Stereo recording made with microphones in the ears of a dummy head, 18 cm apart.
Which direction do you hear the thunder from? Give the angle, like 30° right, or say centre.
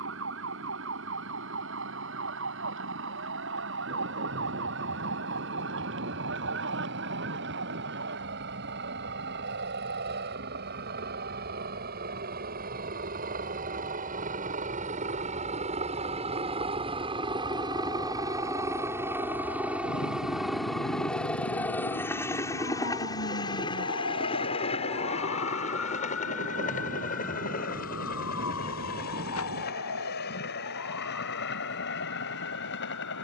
60° right.